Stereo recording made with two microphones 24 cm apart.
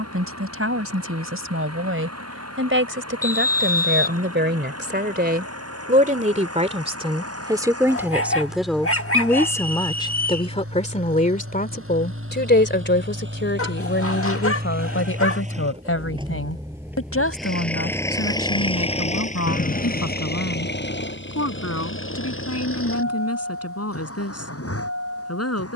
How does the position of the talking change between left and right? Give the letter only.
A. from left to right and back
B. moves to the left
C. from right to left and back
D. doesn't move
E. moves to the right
B.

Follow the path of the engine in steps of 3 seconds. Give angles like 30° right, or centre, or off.
80° right, 70° right, 70° right, 60° right, 50° right, 10° right, 30° left, 60° left, 70° left.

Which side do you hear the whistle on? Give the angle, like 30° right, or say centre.
40° left.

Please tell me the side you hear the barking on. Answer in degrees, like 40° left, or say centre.
60° left.